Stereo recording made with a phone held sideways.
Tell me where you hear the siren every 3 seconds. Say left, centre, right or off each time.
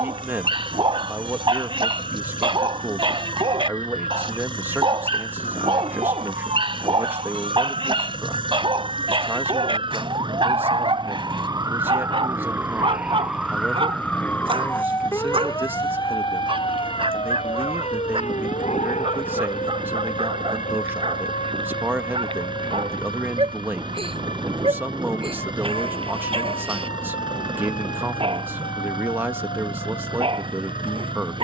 right, right, right, right, centre, left, left, left, left, left, left.